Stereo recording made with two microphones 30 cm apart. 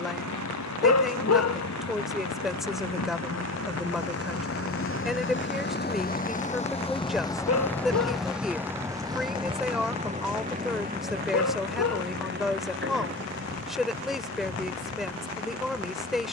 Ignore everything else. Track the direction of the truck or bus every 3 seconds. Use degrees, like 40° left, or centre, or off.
70° left, 50° left, 10° left, 30° right, 40° right, 50° right.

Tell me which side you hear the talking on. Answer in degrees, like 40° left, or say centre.
centre.